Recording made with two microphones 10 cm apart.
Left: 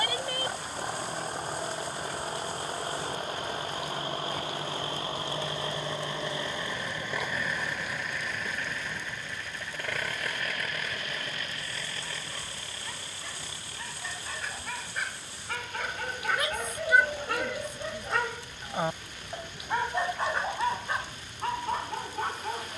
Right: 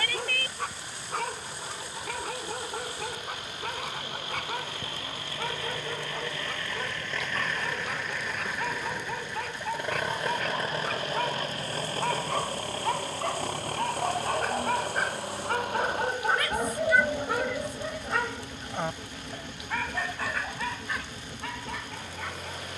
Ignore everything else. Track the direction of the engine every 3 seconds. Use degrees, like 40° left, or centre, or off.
50° left, 30° left, 10° left, 30° right, 50° right, 70° right, 80° right, 80° right.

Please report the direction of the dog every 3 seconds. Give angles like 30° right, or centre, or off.
70° right, 70° right, 70° right, 70° right, 60° right, 30° right, 20° left, 40° left.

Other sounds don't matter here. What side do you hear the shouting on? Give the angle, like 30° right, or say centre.
20° left.